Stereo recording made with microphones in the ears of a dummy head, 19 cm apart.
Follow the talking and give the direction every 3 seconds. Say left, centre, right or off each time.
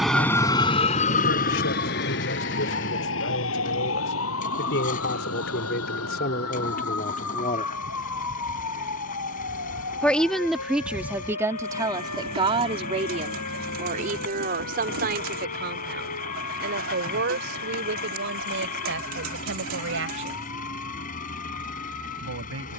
left, left, left, centre, right, right, right, right.